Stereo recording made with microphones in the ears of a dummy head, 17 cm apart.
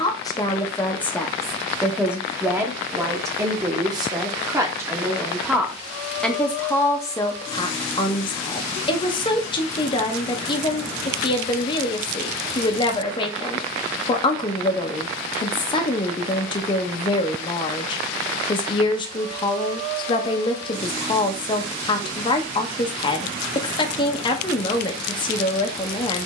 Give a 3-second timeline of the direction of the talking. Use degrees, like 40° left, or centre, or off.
centre, 10° right, 20° left, 30° left, 30° left, 30° left, 30° left, 30° left, 30° left.